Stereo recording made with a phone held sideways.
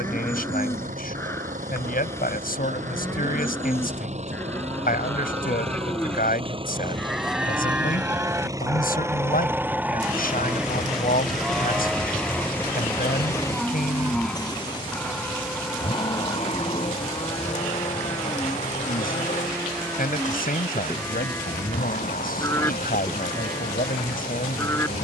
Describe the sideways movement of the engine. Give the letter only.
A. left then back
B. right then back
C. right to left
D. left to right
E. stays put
C.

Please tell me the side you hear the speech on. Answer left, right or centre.
left.